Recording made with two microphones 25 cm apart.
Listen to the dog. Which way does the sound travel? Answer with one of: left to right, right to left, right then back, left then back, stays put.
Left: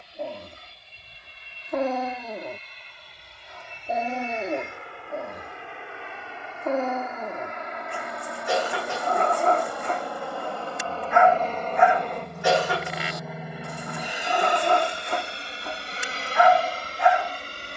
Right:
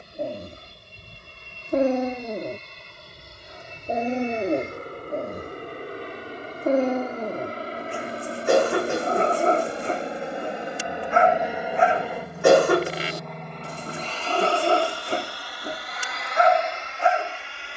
stays put.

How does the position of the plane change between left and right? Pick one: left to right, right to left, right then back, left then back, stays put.
right to left.